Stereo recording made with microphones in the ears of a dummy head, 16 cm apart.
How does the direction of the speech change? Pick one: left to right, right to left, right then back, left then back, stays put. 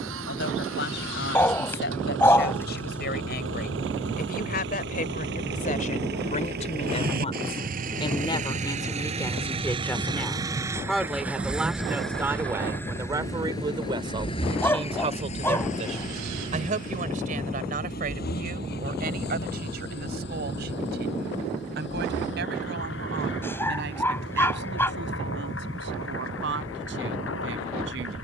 left to right.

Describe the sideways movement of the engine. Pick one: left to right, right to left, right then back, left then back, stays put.
right to left.